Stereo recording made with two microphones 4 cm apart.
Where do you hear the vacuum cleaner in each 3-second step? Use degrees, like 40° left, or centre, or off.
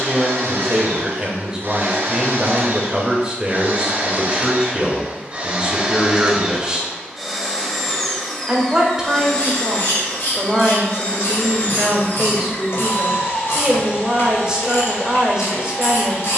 60° right, 30° right, centre, 30° left, 50° left, 50° left.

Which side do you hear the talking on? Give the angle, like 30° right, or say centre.
20° right.